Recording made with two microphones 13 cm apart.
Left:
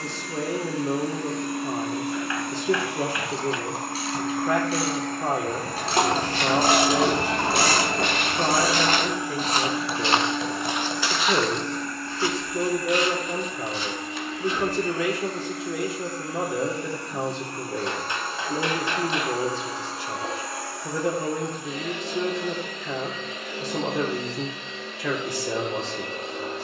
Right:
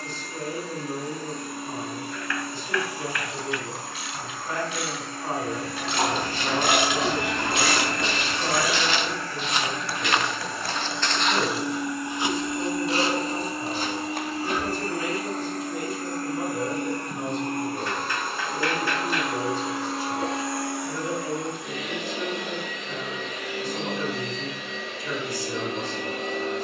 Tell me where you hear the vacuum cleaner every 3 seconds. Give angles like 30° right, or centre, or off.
60° left, 50° left, 30° left, centre, 30° right, 40° right, 60° right, 60° right, 70° right.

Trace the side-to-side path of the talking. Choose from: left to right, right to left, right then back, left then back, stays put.
stays put.